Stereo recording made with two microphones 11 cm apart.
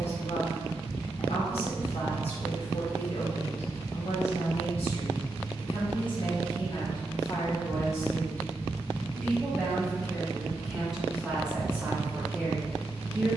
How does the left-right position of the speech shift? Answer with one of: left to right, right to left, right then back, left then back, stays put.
left to right.